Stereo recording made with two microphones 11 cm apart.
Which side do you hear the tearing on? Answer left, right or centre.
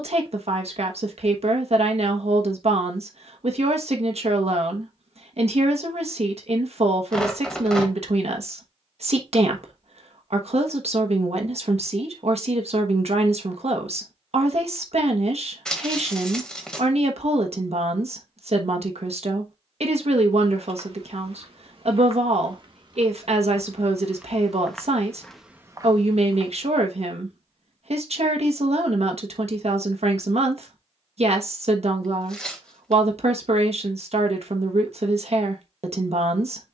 centre.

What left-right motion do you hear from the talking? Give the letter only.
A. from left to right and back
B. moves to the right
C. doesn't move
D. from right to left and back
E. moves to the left
C.